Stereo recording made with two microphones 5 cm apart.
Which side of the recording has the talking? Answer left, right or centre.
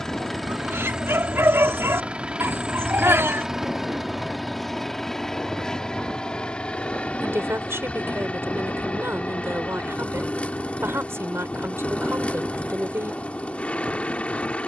right.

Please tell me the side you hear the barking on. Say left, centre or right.
right.